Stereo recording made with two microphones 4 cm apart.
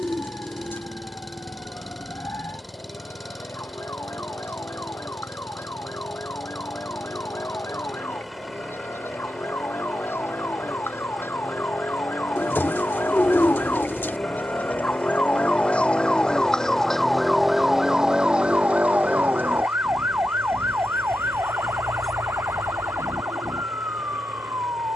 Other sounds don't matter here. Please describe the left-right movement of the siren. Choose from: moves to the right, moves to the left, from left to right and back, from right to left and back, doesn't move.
moves to the right.